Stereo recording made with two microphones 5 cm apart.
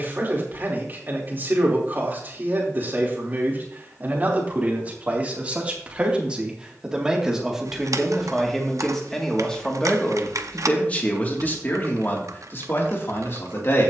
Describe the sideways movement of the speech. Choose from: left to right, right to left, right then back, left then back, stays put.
right to left.